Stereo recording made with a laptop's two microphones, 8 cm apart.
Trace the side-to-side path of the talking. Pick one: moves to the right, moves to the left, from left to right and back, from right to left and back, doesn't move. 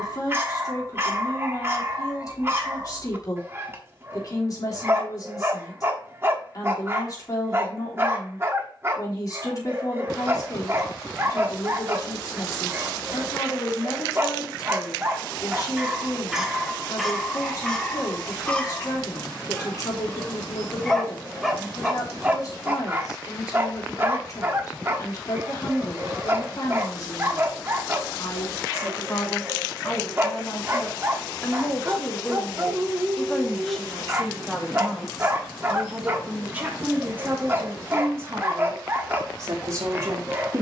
moves to the right.